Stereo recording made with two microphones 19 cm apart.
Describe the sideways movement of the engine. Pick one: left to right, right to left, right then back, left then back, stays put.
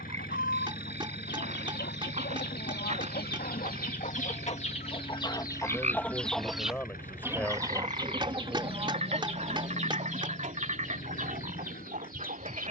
stays put.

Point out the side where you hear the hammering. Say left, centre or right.
right.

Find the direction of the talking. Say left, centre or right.
centre.